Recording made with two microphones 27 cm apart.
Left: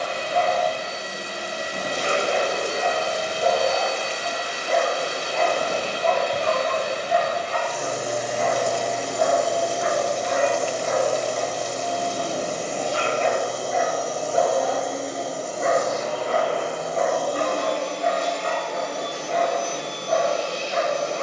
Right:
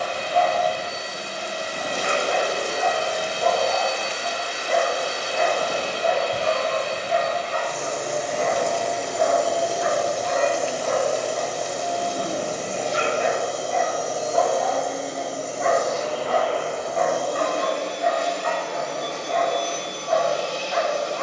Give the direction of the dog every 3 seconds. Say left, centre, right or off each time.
left, centre, right, right, centre, left, left.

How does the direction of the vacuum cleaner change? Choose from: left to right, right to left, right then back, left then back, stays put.
right then back.